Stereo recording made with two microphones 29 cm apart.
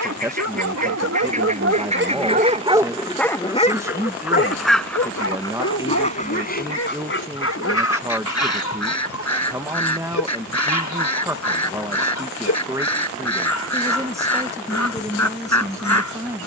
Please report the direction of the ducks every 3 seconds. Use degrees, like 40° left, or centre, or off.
20° right, centre, 50° left, 70° left, 70° left, 70° left.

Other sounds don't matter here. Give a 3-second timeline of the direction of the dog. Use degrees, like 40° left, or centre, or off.
50° right, 40° left, 70° left, 70° left, 70° left, 70° left.